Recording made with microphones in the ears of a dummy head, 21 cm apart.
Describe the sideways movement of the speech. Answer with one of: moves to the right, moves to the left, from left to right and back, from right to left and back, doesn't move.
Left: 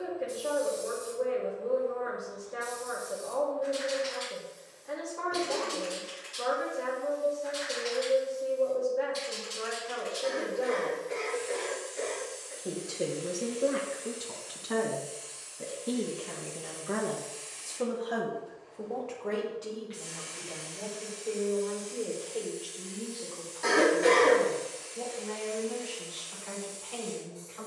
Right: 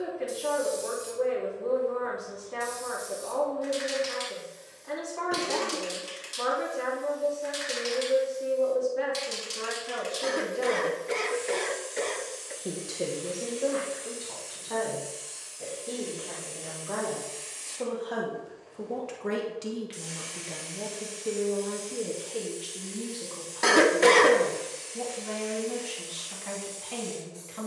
from right to left and back.